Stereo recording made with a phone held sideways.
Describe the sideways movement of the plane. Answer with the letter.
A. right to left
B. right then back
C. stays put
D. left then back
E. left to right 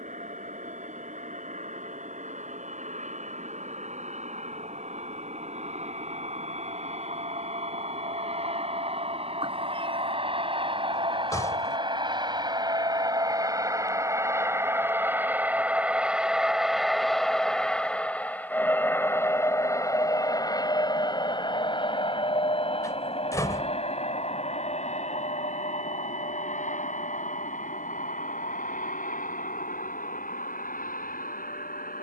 A.